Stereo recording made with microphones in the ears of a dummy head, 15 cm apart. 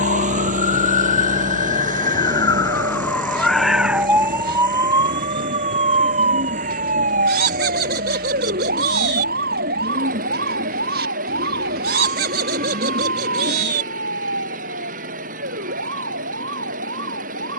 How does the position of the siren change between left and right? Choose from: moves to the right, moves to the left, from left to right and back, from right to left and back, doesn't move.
moves to the right.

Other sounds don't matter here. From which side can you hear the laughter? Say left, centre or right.
right.